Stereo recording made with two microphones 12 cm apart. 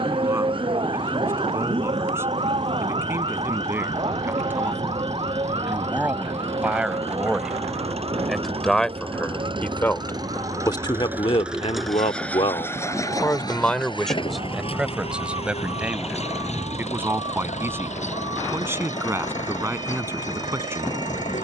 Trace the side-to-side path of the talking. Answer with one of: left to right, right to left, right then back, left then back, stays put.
left then back.